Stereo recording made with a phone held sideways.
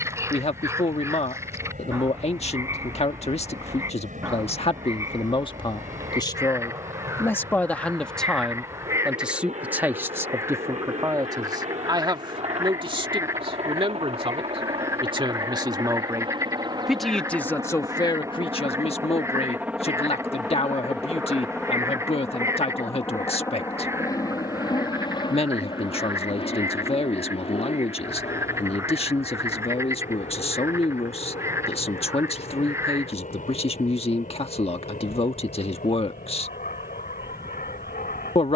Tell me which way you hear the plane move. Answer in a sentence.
You can hear the plane travel towards the left.